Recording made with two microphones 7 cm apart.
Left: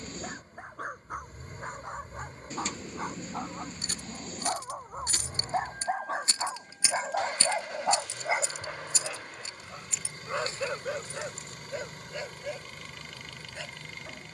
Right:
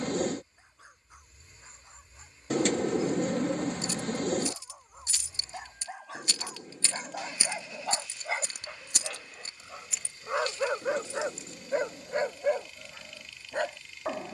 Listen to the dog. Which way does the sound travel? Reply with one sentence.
In this clip you hear the dog travel towards the right.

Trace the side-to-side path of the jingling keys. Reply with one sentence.
In this clip you hear the jingling keys go right and come back.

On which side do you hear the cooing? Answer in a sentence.
In this clip you hear the cooing on the right.